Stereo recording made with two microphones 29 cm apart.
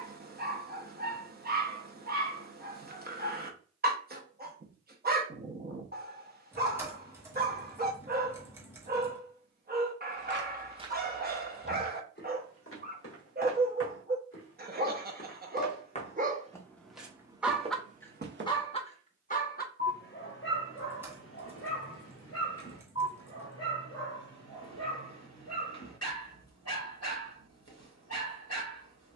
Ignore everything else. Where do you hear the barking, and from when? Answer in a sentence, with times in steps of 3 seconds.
You can hear the barking on the right from 0 s and on the left from 18 s.